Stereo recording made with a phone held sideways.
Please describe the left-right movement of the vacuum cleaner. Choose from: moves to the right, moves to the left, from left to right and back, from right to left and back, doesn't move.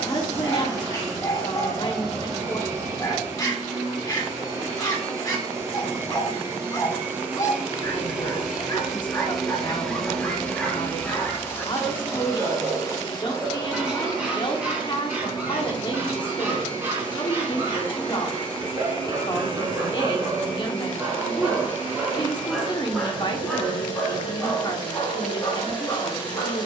moves to the left.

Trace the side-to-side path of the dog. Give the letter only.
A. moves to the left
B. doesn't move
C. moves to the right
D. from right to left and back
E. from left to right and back
E.